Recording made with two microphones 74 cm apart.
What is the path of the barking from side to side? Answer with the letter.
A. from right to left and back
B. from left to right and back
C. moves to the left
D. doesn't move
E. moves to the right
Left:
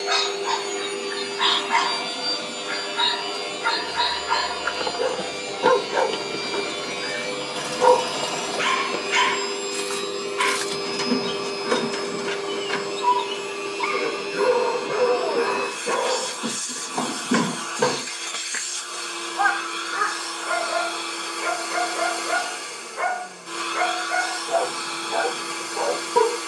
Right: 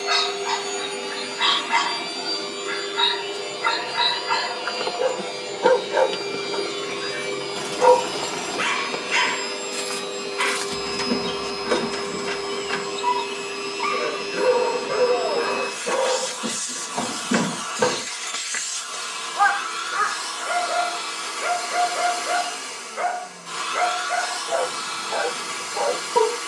D.